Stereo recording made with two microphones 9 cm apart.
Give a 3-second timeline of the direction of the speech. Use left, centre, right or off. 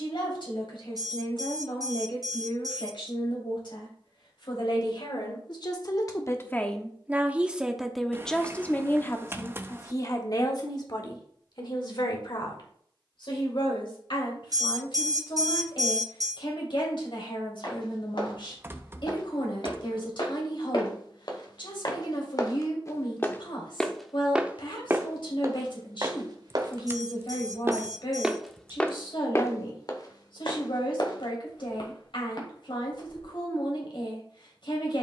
left, left, centre, left, left, left, left, left, left, left, left, left.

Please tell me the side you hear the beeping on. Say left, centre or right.
right.